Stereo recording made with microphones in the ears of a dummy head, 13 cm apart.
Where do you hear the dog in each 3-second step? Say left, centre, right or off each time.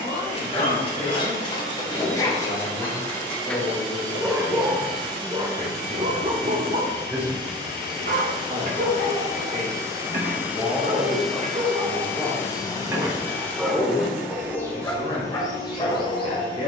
left, centre, right, right, centre, left.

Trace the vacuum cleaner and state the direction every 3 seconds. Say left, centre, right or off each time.
right, right, right, centre, centre, right.